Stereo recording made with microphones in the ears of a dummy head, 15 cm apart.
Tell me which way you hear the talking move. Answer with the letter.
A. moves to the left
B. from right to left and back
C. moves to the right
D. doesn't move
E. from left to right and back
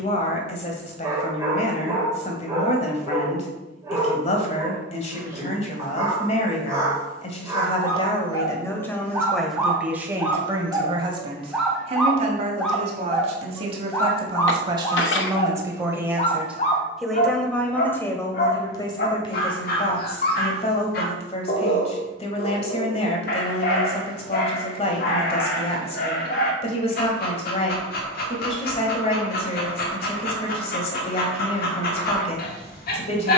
E.